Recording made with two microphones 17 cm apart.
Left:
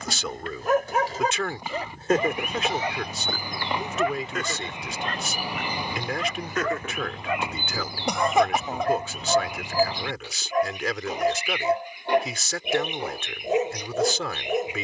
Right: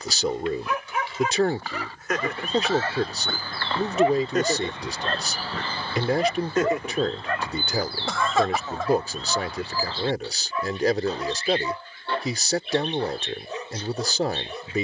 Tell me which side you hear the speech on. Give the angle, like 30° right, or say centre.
40° right.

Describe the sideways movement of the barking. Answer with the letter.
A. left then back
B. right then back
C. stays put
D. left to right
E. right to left
B.